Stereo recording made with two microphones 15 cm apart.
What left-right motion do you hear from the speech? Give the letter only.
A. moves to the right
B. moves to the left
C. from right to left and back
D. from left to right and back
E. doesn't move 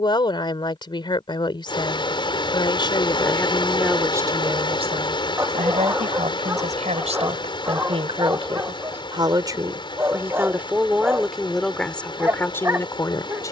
D.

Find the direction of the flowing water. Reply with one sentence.
You can hear the flowing water on the left.